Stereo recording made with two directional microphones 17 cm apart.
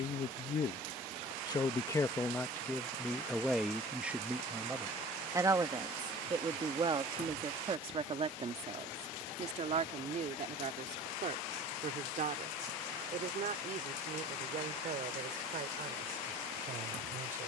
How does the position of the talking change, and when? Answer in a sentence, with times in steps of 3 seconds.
In this clip you hear the talking on the left from 0 s, in the centre from 3 s and on the right from 6 s.